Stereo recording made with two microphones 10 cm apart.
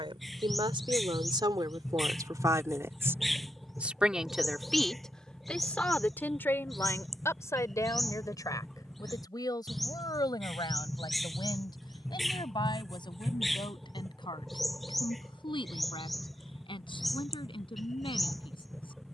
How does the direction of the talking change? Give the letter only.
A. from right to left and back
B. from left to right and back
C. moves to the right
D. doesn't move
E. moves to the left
E.